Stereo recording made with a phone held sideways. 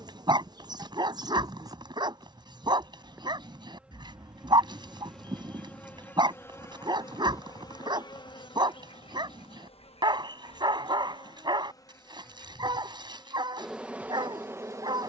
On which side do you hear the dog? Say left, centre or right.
right.